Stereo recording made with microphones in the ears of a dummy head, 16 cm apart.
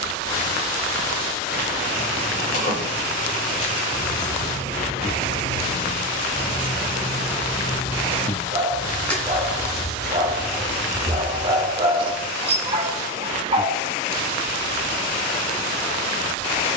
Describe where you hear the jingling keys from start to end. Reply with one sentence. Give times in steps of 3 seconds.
In this clip you hear the jingling keys on the left from 0 s, in the centre from 9 s and not at all from 12 s.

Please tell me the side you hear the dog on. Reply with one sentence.
In this clip you hear the dog on the right.